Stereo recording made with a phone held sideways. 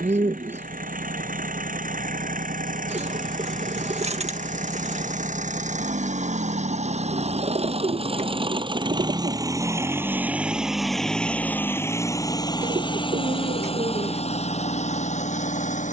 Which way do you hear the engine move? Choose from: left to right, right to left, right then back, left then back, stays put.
right to left.